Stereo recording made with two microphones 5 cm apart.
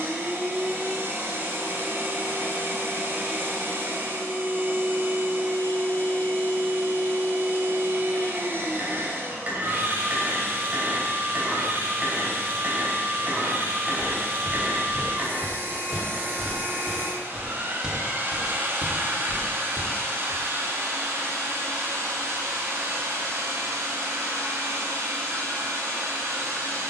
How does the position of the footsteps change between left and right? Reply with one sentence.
In this clip you hear the footsteps go from the left side to the right.